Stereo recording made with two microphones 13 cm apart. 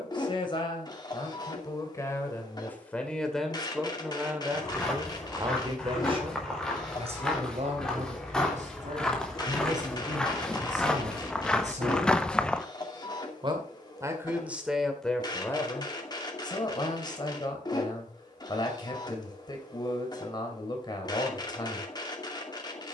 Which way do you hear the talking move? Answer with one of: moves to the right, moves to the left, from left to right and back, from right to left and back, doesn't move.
from left to right and back.